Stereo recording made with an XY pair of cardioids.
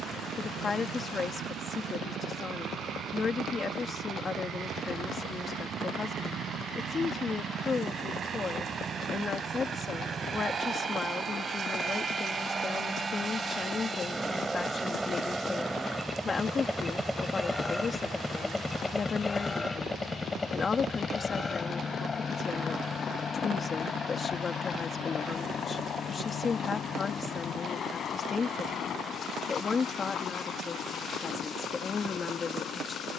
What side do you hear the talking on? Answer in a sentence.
In this clip you hear the talking on the left.